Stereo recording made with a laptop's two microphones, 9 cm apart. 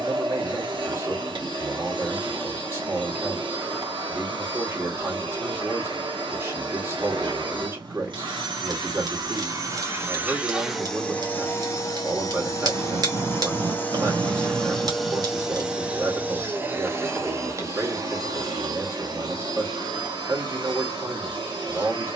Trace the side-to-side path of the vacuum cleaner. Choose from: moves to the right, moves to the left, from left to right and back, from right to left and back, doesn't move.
from right to left and back.